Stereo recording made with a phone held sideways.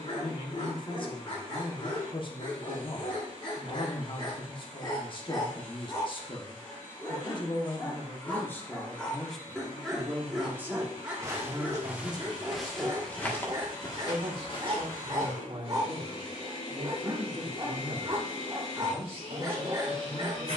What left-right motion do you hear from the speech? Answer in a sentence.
You can hear the speech go from the left side to the right.